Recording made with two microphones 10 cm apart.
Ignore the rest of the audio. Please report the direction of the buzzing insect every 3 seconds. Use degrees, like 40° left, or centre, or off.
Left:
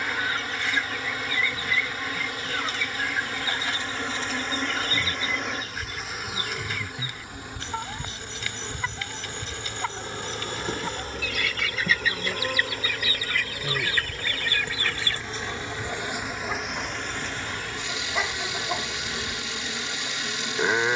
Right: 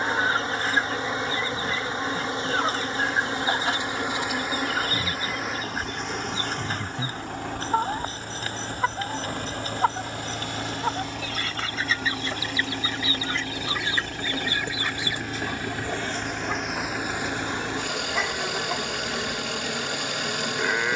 30° right, 10° right, 20° left, 40° left, 50° left, centre, 20° right.